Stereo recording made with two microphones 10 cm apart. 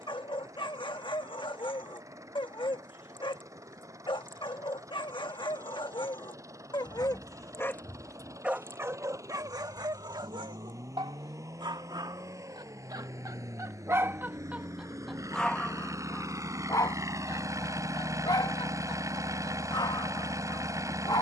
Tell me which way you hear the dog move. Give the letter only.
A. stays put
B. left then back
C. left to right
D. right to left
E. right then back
E.